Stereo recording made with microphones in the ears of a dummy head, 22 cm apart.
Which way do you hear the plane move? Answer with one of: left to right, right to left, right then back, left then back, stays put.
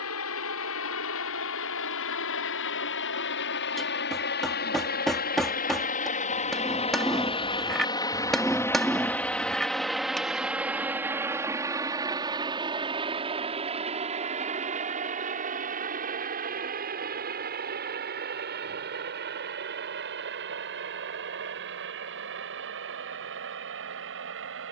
left to right.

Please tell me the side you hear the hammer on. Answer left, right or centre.
centre.